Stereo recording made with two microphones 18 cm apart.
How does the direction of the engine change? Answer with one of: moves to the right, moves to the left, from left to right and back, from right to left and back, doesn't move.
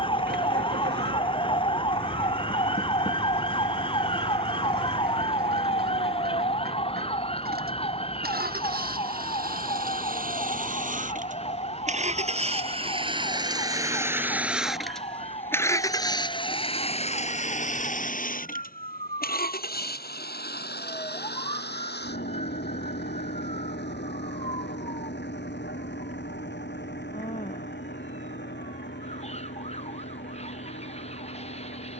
moves to the left.